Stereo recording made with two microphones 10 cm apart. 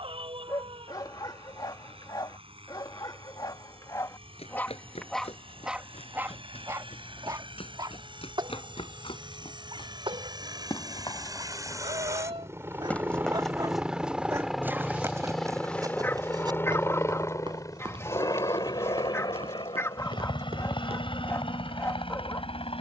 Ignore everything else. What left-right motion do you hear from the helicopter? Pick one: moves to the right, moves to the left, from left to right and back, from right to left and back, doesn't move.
moves to the left.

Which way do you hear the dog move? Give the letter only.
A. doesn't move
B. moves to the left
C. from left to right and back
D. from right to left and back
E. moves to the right
C.